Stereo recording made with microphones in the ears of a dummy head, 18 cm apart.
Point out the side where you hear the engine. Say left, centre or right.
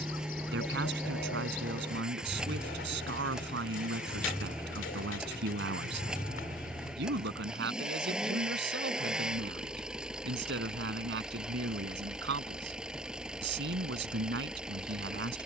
centre.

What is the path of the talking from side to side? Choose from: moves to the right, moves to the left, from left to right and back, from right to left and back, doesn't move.
doesn't move.